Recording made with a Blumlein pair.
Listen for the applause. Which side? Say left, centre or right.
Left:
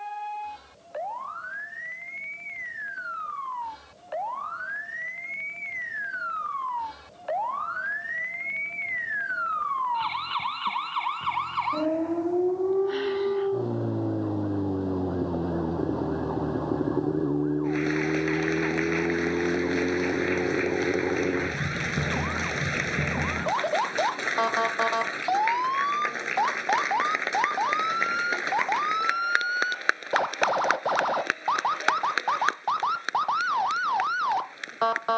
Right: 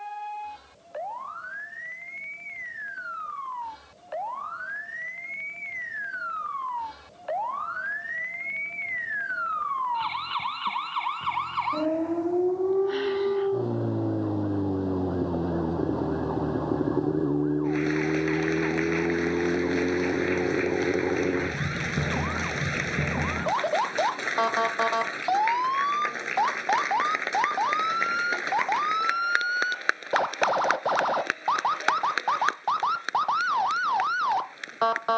centre.